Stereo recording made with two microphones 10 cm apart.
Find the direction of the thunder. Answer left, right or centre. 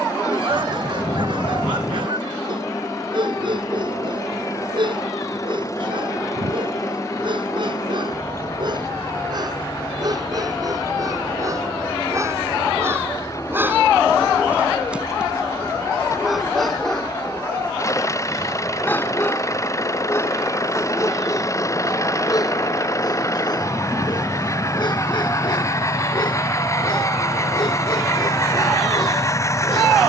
left.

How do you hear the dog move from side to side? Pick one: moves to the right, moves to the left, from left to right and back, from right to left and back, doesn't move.
moves to the left.